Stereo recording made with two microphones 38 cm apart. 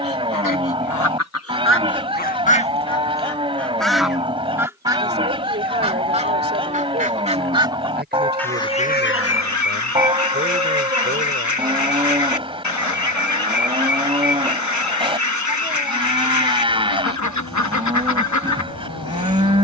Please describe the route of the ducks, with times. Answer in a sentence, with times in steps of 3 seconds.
In this clip you hear the ducks on the left from 0 s, in the centre from 3 s and on the left from 9 s.